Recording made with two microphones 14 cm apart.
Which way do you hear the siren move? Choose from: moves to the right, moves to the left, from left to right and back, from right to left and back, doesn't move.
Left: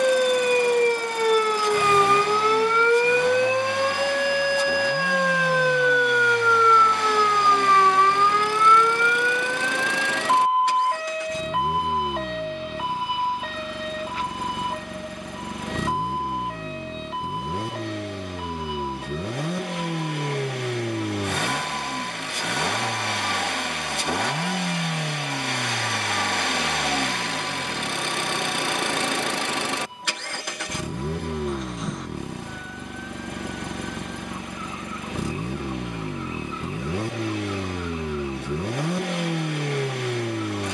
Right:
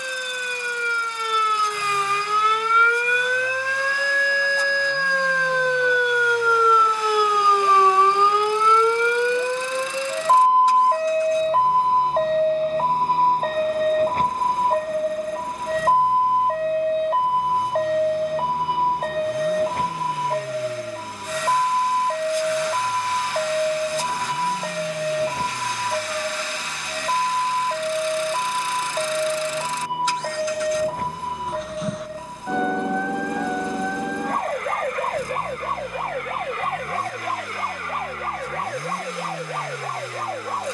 moves to the right.